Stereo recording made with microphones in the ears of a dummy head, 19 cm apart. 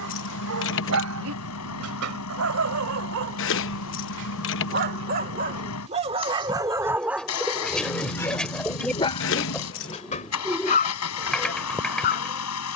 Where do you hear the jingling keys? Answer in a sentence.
In this clip you hear the jingling keys on the left.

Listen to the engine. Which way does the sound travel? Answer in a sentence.
In this clip you hear the engine stay in one place.